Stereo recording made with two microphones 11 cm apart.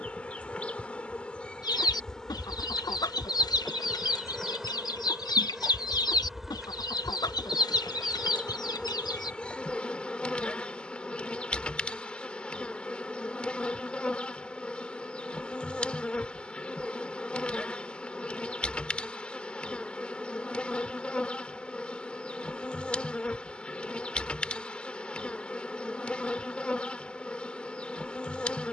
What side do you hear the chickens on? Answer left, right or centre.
left.